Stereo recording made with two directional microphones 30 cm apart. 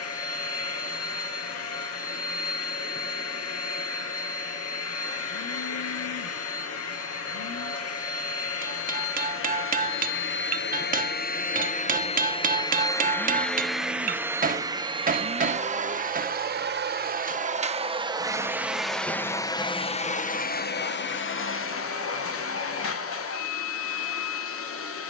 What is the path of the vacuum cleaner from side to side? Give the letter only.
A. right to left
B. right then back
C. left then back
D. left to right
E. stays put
B.